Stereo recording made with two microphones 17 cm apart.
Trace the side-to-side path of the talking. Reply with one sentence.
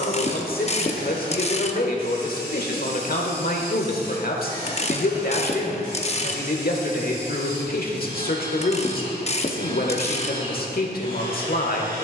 In this clip you hear the talking stay put.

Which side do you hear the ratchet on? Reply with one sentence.
In this clip you hear the ratchet on the left.